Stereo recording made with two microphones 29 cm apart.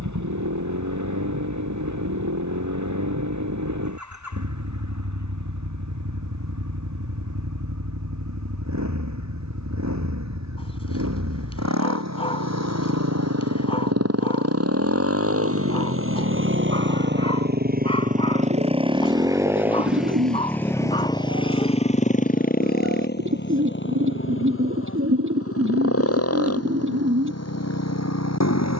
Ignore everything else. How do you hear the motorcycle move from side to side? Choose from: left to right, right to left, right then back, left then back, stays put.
right to left.